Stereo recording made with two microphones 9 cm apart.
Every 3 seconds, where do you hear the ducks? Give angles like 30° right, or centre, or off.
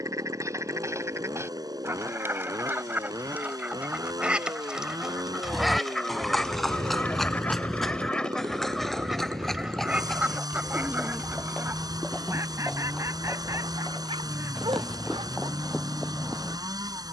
30° right, 10° right, 10° left, 10° right, 30° right, 30° right.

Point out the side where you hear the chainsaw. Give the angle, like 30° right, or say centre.
40° right.